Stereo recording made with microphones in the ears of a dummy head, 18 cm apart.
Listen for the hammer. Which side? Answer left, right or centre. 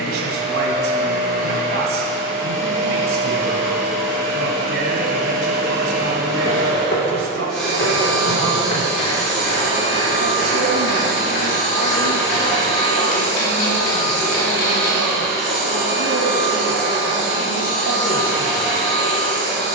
left.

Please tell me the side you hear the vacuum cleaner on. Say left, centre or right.
centre.